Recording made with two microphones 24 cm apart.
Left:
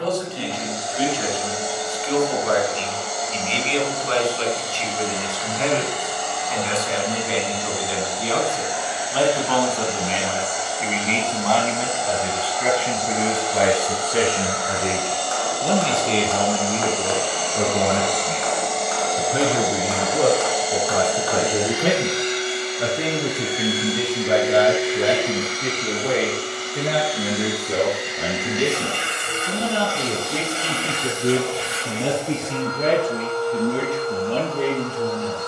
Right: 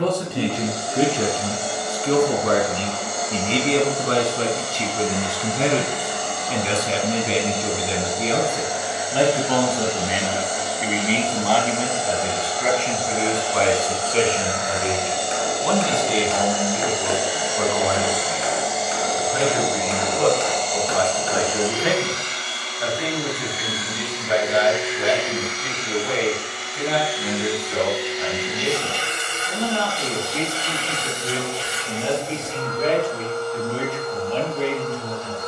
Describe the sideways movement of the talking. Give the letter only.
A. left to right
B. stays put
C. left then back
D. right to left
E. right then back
D.